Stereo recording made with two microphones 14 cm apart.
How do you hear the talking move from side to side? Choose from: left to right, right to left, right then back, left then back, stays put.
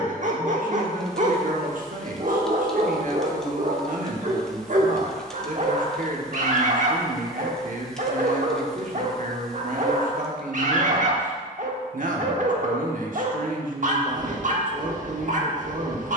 stays put.